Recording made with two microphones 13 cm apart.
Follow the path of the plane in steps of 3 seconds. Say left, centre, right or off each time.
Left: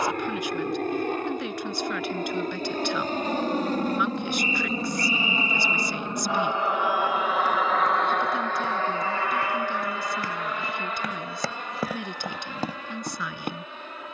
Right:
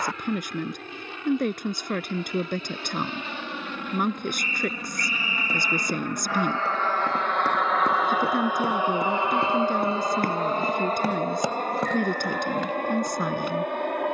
left, left, centre, right, right.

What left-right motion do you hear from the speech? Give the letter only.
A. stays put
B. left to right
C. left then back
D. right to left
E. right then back
A.